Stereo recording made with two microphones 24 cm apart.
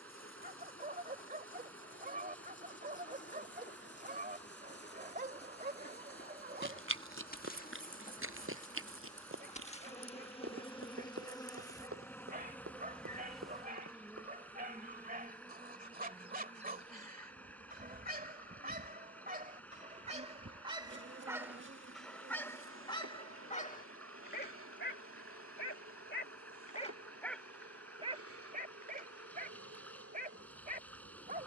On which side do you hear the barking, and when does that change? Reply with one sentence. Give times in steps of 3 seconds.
You can hear the barking on the right from 0 s, in the centre from 21 s, on the left from 24 s and on the right from 27 s.